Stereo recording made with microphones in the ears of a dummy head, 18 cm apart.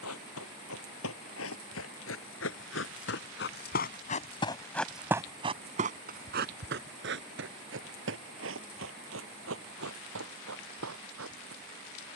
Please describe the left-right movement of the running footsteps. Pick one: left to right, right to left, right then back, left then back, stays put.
left to right.